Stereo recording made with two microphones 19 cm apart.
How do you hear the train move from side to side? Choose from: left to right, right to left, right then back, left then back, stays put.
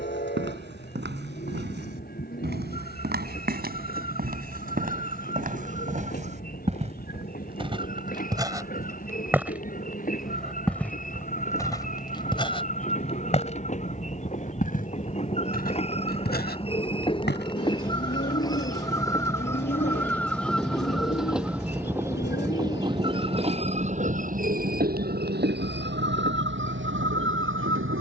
left to right.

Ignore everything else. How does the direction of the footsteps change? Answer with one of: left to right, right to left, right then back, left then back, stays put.
right to left.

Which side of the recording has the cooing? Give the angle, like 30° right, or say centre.
50° left.